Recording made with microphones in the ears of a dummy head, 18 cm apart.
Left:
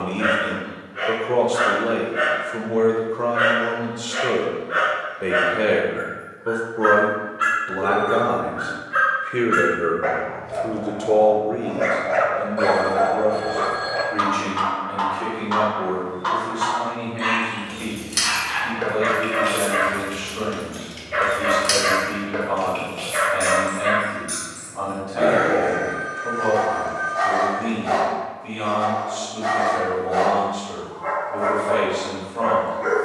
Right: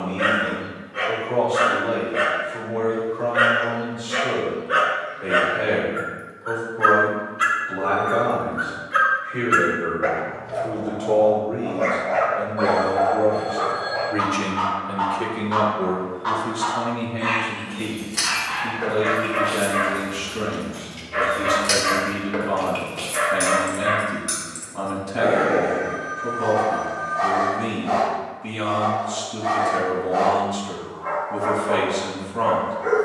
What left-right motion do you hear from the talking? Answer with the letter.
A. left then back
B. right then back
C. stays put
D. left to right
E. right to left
D.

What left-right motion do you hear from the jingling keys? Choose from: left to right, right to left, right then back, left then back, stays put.
left to right.